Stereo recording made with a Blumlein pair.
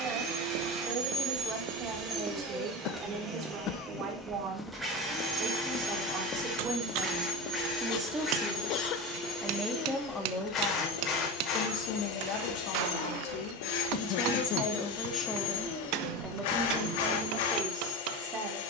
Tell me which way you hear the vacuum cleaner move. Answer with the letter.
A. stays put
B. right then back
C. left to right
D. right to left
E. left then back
D.